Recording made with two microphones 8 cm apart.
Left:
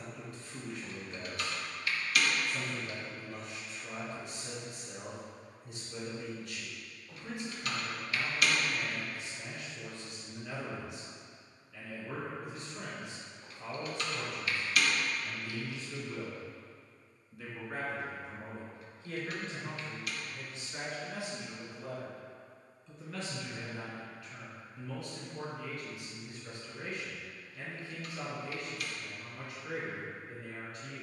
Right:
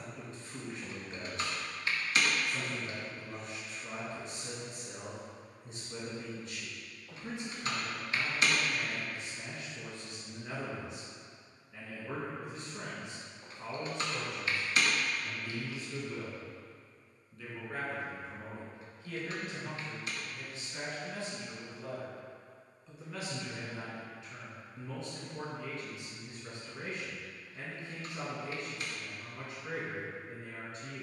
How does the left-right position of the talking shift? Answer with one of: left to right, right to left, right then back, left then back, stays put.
left then back.